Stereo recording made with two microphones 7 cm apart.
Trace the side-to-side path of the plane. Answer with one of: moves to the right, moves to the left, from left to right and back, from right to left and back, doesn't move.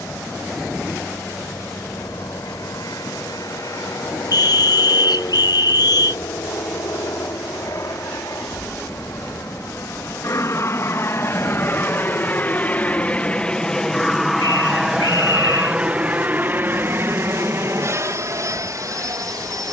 moves to the right.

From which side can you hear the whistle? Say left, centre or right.
left.